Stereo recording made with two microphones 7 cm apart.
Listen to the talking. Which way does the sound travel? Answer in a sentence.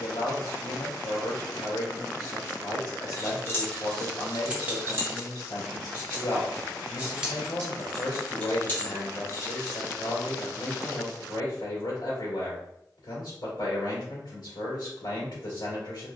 You can hear the talking stay put.